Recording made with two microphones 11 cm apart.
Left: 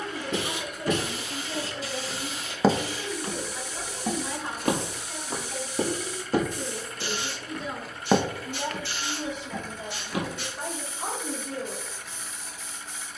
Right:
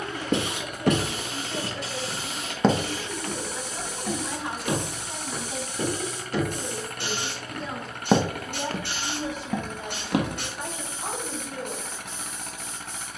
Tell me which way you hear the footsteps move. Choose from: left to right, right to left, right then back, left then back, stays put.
left then back.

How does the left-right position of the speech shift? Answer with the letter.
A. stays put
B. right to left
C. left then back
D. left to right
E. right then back
E.